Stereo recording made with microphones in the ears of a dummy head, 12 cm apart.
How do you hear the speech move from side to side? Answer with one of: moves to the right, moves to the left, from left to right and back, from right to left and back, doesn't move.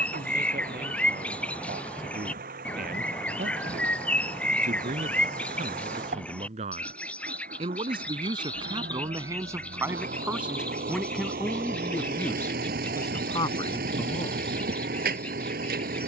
moves to the left.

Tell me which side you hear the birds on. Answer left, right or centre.
centre.